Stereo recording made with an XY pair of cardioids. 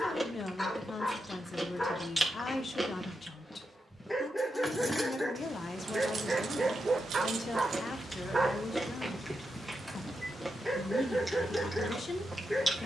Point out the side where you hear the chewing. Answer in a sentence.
You can hear the chewing in the centre.